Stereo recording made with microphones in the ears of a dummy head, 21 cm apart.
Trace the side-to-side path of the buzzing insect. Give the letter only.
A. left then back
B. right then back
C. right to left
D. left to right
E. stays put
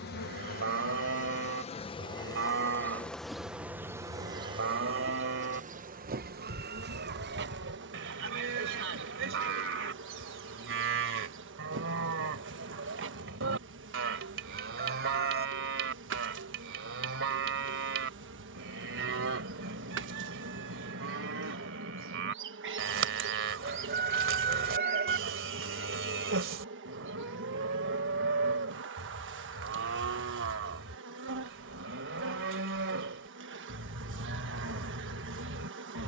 D.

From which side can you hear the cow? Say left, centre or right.
right.